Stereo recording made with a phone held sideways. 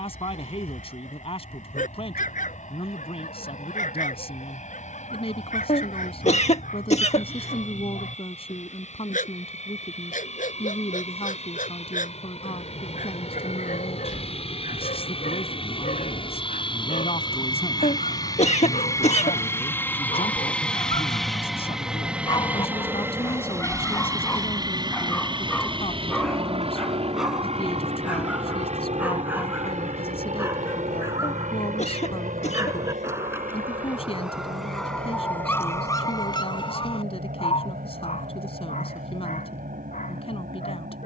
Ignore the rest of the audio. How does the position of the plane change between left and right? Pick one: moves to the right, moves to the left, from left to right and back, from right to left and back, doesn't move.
moves to the right.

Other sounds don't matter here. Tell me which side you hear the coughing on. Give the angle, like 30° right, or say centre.
60° left.